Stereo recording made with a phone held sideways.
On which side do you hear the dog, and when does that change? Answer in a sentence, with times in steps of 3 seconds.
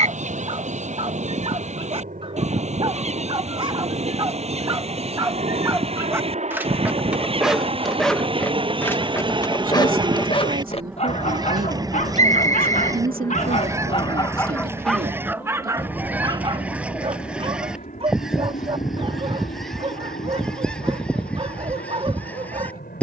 You can hear the dog on the right from 0 s, in the centre from 6 s, on the left from 9 s and on the right from 15 s.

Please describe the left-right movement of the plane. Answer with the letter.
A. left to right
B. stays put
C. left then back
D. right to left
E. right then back
D.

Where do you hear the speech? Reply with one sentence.
In this clip you hear the speech on the right.